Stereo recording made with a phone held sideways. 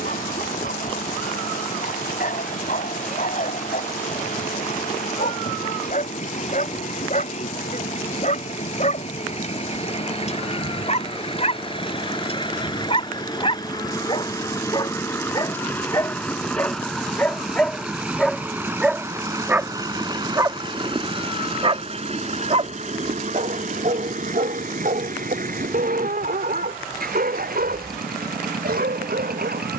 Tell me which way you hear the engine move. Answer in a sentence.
In this clip you hear the engine go from the left side to the right.